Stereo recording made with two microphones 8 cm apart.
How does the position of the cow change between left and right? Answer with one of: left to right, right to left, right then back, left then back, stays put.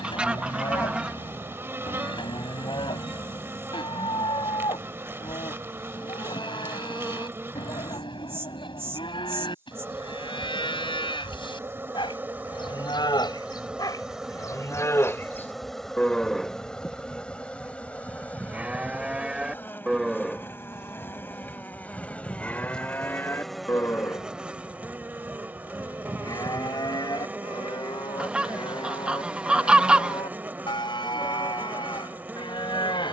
right then back.